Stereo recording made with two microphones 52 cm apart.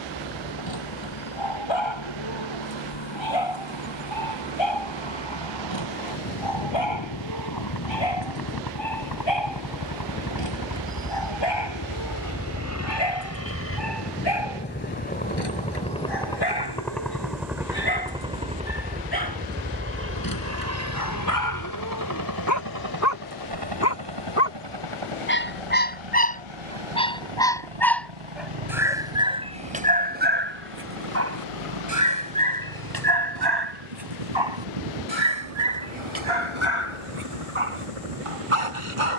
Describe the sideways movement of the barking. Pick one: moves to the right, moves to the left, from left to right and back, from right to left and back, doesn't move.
moves to the right.